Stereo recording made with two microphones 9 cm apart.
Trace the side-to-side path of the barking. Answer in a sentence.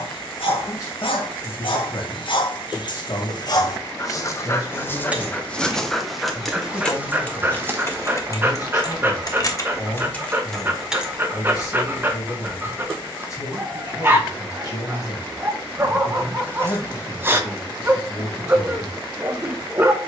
In this clip you hear the barking move from left to right.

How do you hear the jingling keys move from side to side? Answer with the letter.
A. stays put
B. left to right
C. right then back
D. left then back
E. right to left
D.